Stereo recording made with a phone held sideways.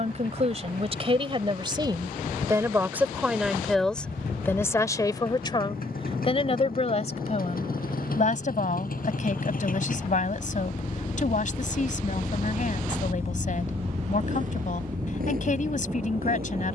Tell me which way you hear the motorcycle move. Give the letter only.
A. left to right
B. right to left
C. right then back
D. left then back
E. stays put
A.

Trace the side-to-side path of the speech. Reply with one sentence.
In this clip you hear the speech go from the right side to the left.